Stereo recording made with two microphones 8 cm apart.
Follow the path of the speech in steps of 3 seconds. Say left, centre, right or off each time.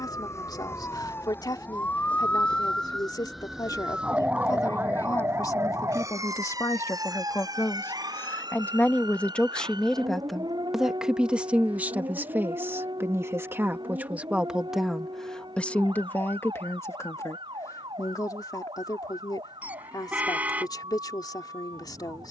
left, left, left, centre, right, left, left, left.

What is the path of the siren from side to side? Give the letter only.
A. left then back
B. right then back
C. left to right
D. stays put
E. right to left
C.